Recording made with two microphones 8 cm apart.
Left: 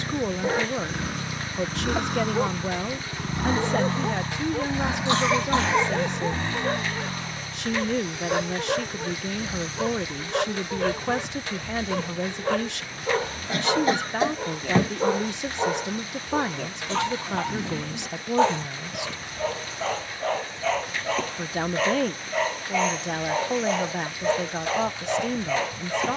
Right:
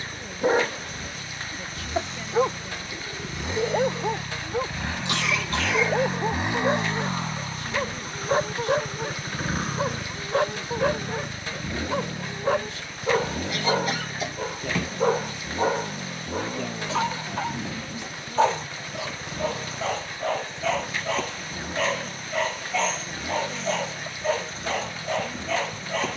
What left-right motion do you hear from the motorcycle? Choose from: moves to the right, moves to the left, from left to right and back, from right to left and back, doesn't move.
moves to the right.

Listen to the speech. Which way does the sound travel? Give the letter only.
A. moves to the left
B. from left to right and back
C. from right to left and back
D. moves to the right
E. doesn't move
E.